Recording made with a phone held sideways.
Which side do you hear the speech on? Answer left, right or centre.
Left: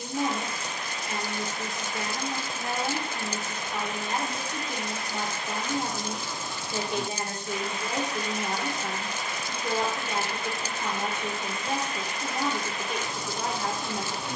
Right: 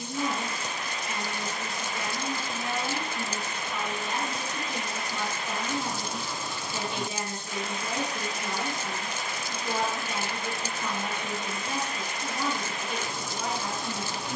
left.